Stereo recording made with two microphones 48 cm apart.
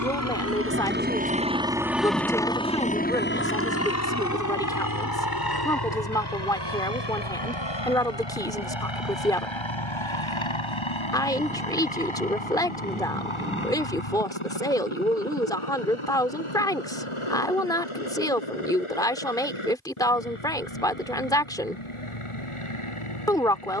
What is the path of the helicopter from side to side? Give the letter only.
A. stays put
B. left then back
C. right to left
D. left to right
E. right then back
C.